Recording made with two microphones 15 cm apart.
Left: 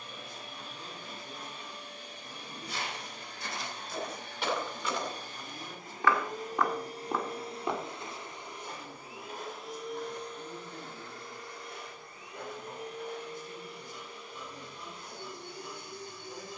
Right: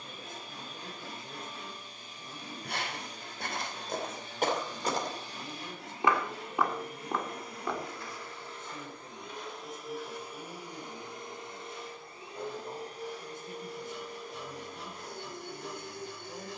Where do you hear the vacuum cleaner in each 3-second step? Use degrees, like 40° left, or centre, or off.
70° left, 60° left, 30° left, 10° right, 40° right, 50° right.